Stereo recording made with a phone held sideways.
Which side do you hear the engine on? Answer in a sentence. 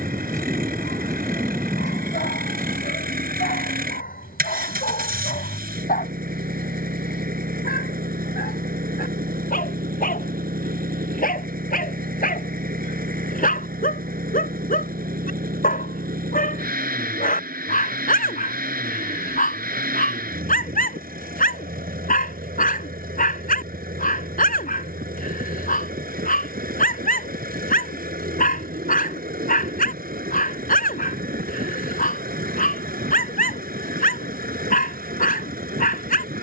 In this clip you hear the engine on the right.